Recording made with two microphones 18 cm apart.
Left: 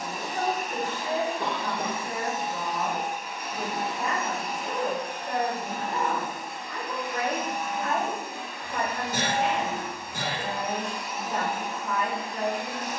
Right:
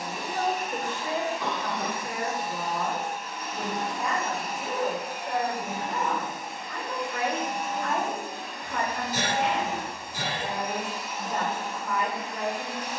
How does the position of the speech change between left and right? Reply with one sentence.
You can hear the speech move from right to left and back again.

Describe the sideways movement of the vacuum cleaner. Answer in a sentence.
You can hear the vacuum cleaner go right and come back.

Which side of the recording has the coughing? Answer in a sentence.
You can hear the coughing on the left.